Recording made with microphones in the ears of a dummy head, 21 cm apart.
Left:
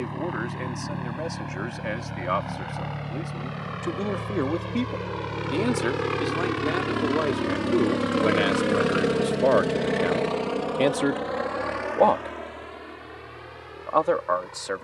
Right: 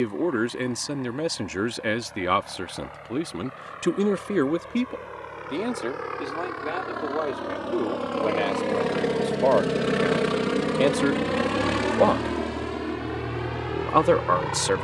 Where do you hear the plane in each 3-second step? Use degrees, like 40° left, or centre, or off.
70° left, 60° left, 40° left, 20° right, 60° right.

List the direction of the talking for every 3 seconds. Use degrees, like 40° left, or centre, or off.
50° right, 20° right, 20° left, 10° left, 40° right.